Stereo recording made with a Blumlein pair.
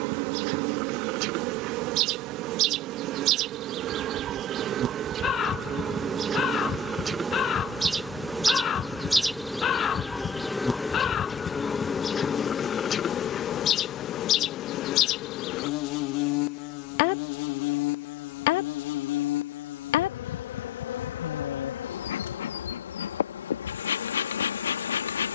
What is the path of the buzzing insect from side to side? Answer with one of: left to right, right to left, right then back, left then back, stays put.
right to left.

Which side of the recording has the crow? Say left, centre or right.
left.